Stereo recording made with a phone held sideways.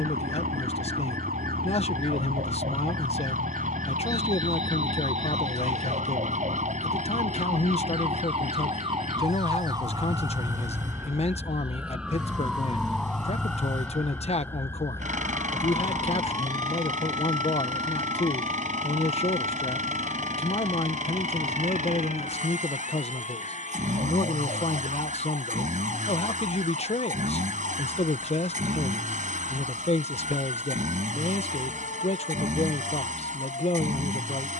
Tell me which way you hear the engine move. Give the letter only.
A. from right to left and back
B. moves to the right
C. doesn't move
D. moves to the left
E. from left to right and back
C.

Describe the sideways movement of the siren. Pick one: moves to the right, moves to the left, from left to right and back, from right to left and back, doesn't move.
moves to the left.